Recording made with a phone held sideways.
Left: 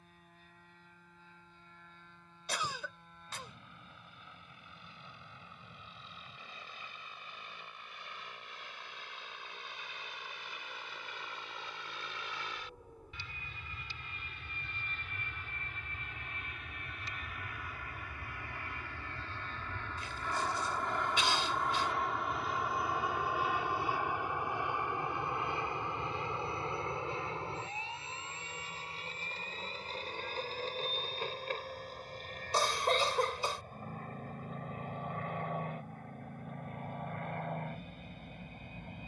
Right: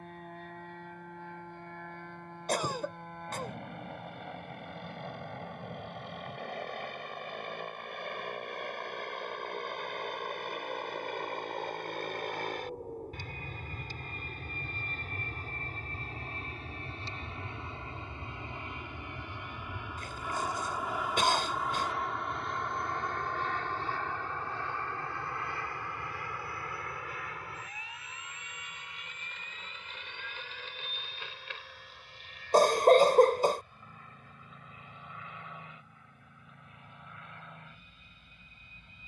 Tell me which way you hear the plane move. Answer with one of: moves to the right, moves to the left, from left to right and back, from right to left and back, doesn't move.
moves to the left.